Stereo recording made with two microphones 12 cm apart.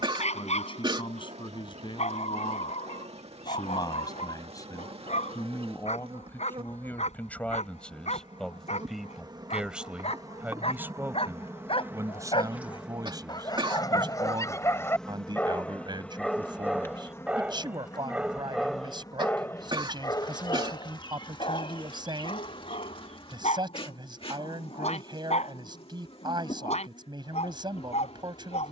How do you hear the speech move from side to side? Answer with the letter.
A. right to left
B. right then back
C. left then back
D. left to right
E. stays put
D.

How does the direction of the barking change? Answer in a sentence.
In this clip you hear the barking go right and come back.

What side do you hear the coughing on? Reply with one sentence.
You can hear the coughing on the right.